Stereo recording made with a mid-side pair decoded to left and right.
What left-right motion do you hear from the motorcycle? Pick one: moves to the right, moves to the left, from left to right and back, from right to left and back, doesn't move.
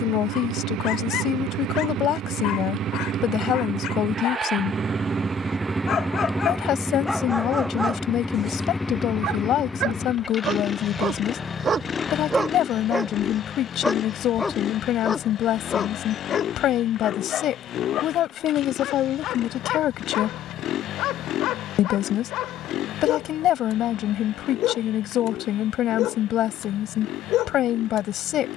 moves to the left.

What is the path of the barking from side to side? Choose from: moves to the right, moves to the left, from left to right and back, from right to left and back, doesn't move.
from left to right and back.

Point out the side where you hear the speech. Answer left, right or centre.
left.